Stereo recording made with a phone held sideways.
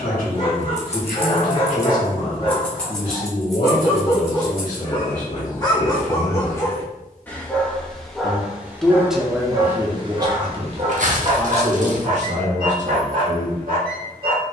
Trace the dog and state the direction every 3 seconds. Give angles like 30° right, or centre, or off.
40° left, 30° left, 10° left, 40° right, 70° right.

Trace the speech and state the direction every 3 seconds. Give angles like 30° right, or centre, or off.
70° left, 60° left, 30° left, 30° right, 60° right.